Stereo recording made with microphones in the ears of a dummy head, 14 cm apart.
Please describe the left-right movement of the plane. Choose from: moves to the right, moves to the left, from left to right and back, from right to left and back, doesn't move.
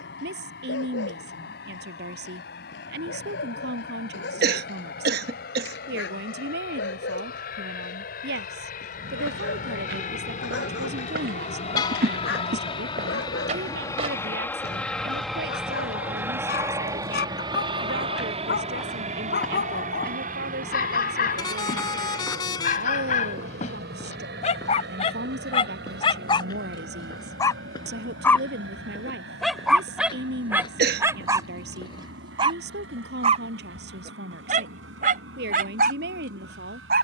moves to the right.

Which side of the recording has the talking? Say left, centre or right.
right.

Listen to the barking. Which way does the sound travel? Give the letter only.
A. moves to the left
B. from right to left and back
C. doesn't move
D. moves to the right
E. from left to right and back
D.